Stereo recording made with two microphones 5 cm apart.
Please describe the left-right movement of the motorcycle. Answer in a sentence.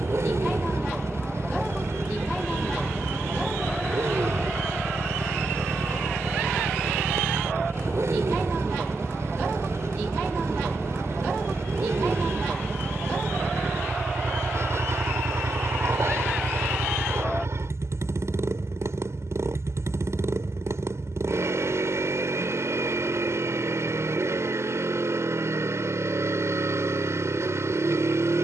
You can hear the motorcycle stay in one place.